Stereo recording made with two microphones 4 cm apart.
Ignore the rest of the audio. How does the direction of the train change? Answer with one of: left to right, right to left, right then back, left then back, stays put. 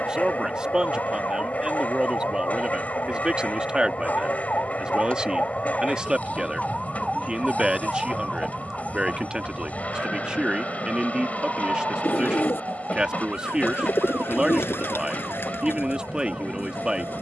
stays put.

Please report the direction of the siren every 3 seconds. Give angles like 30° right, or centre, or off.
60° left, 40° left, centre, 30° right, 40° right, 50° right.